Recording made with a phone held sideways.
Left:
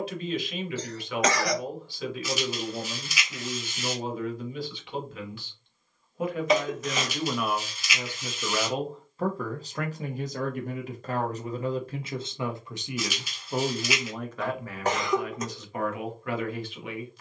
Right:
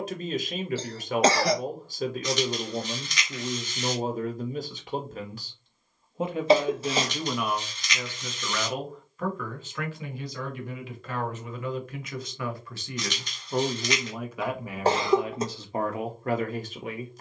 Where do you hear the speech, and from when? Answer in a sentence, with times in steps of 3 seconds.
You can hear the speech on the right from 0 s, in the centre from 6 s, on the left from 9 s, in the centre from 12 s and on the right from 15 s.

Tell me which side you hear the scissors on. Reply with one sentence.
You can hear the scissors in the centre.